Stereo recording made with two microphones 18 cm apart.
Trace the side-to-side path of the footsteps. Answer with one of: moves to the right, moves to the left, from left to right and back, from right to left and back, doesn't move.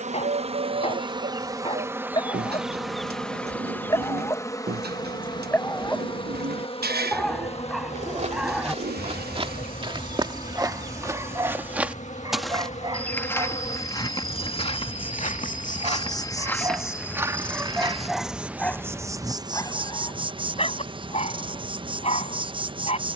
from right to left and back.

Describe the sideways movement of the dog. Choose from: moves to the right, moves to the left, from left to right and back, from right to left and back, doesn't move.
from left to right and back.